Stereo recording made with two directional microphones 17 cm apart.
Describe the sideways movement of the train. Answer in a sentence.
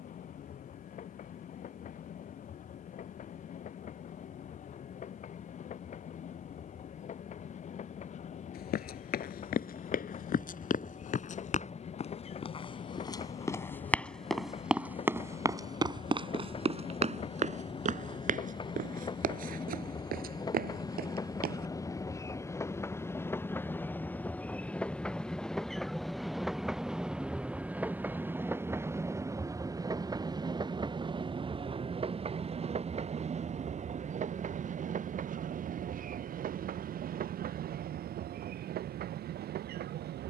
You can hear the train move to the right.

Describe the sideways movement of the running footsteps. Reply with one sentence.
In this clip you hear the running footsteps move to the right.